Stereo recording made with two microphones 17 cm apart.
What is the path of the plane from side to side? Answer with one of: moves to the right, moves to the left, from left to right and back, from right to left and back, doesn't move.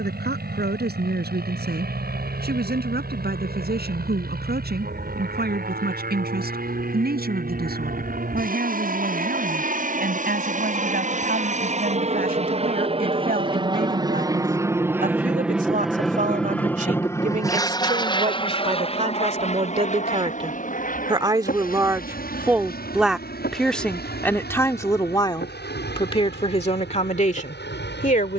moves to the left.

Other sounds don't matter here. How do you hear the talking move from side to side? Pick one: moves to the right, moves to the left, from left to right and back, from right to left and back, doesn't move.
moves to the left.